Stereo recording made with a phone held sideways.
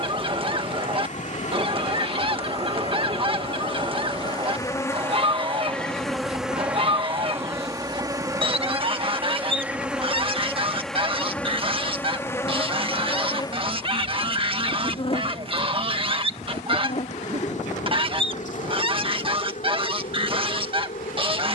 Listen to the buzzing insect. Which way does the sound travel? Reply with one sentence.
You can hear the buzzing insect go right and come back.